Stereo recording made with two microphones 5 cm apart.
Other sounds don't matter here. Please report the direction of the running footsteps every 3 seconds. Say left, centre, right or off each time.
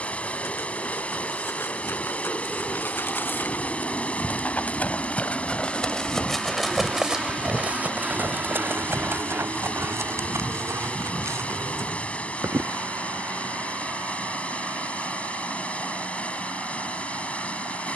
left, left, right, right, right, off.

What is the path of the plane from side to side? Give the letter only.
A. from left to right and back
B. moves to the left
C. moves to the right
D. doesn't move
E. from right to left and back
C.